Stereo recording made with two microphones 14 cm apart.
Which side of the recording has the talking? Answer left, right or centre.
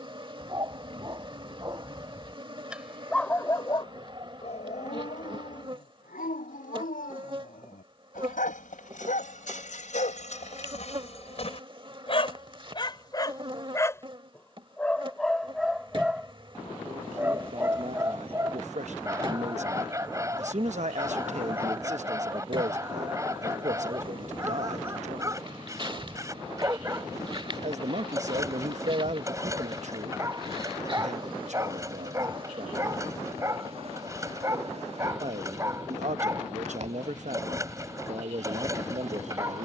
right.